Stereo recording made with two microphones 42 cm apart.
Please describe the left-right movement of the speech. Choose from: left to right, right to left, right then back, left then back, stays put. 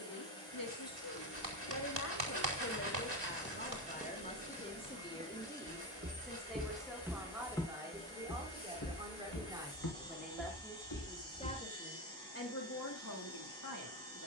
right then back.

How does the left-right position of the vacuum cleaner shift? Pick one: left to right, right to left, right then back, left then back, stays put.
stays put.